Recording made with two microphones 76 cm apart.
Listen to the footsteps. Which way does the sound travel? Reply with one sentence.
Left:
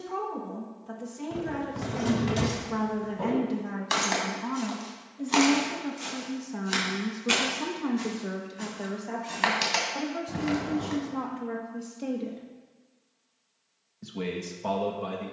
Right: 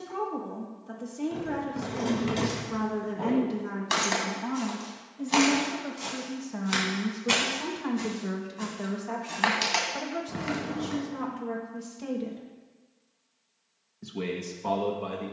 In this clip you hear the footsteps move from left to right and back again.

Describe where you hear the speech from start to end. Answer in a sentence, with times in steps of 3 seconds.
In this clip you hear the speech on the left from 0 s, in the centre from 3 s, on the right from 6 s and in the centre from 12 s.